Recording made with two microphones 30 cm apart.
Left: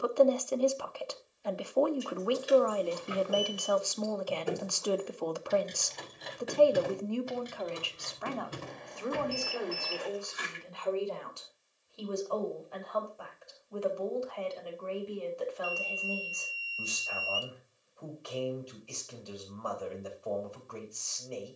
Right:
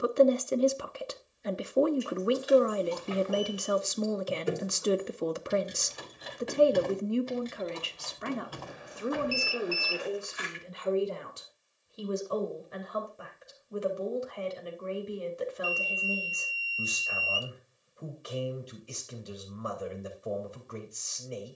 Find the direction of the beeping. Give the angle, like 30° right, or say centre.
10° right.